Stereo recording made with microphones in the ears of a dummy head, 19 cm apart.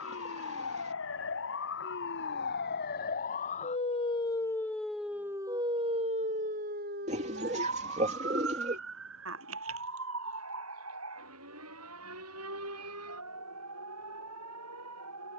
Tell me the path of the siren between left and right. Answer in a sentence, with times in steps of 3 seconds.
In this clip you hear the siren on the left from 0 s, in the centre from 3 s and on the right from 6 s.